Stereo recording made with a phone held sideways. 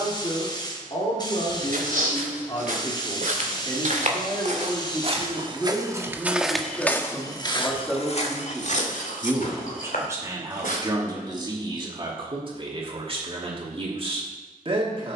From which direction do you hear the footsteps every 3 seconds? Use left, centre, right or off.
right, right, left, left, off.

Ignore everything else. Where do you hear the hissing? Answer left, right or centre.
left.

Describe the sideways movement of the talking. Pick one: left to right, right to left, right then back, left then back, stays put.
left to right.